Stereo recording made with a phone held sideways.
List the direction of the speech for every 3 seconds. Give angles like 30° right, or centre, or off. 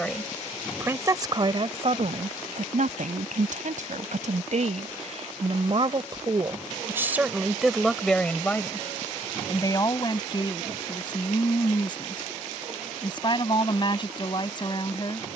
40° right, 60° right, 10° right, 30° left, 40° left.